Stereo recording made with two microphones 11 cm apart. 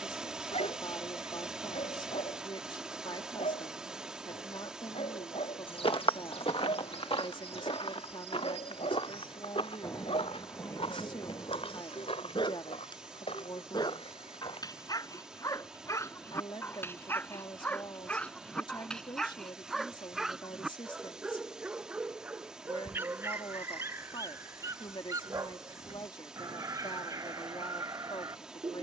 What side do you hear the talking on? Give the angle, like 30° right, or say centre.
40° left.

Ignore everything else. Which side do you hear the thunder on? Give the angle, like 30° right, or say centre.
30° left.